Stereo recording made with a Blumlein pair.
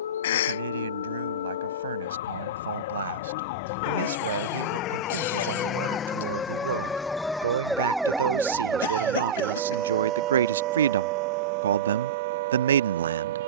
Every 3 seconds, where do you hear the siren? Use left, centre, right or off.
left, left, centre, right, right.